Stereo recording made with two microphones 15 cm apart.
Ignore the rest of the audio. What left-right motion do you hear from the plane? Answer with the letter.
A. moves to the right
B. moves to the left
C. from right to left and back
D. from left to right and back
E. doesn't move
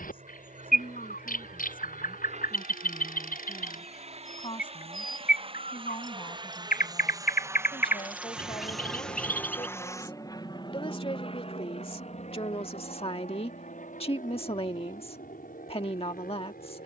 B.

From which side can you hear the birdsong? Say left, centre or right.
left.